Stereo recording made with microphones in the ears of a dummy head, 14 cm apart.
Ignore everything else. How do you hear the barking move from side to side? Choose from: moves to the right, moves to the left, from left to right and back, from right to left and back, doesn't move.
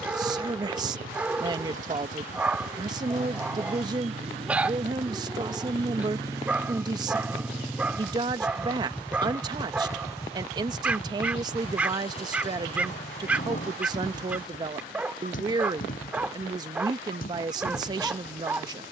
doesn't move.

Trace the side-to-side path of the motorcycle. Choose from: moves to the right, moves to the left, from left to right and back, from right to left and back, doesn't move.
moves to the left.